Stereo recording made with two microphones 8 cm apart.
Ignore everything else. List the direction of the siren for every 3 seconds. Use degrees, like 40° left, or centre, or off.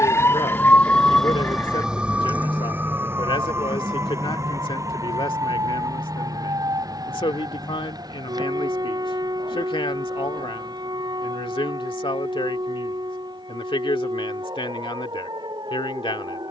centre, 30° right, 40° right, 50° right, 50° right, 50° right.